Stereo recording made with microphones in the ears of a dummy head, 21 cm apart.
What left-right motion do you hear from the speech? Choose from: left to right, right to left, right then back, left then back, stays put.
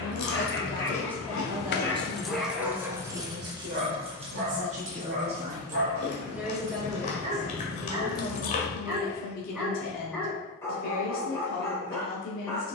right then back.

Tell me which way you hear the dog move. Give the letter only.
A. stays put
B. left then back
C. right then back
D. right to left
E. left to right
C.